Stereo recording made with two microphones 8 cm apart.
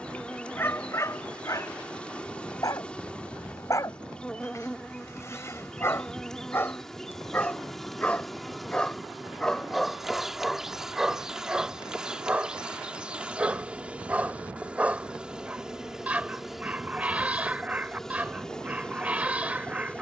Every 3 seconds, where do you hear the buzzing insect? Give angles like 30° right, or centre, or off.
10° left, 10° left, centre, 10° right, 10° right, centre, 10° left.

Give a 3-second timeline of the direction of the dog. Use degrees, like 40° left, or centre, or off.
40° left, 40° left, 20° left, centre, 20° right, 20° right, 20° right.